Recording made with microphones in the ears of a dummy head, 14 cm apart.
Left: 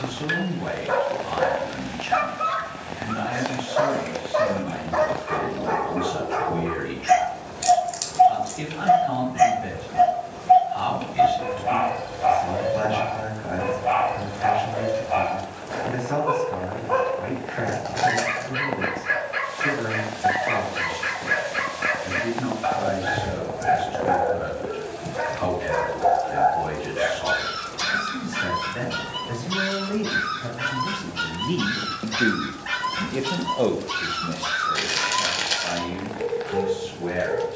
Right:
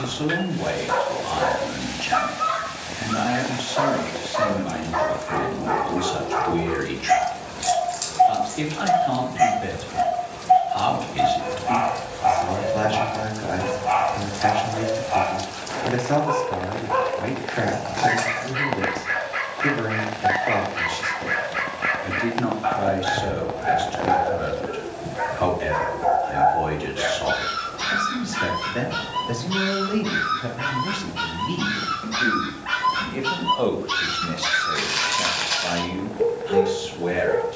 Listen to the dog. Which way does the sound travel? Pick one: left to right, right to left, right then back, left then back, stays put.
left to right.